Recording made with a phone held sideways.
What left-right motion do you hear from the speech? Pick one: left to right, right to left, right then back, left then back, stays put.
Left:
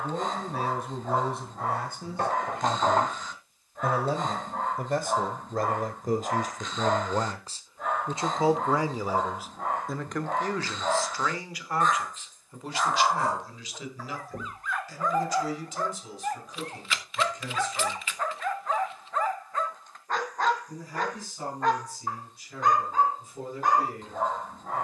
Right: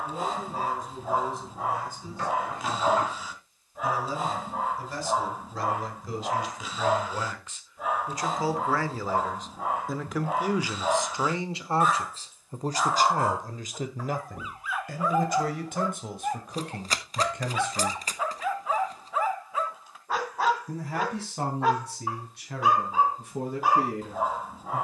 left to right.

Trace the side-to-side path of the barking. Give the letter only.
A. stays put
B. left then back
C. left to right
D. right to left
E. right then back
A.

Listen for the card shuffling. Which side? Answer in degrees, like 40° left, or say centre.
40° right.